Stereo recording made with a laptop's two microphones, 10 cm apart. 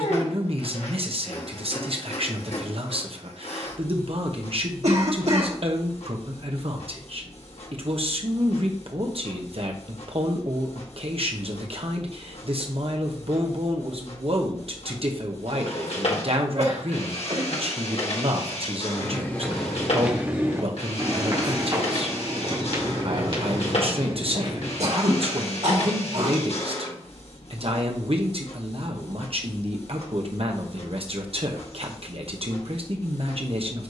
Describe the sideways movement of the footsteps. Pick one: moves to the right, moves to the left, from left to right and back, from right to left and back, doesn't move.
moves to the right.